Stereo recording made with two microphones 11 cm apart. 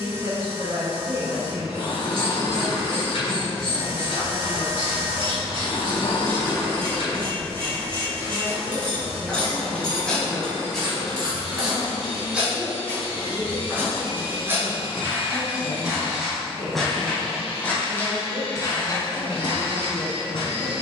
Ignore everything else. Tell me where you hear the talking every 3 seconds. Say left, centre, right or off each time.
right, right, centre, centre, left, left, left.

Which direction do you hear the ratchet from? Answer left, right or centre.
right.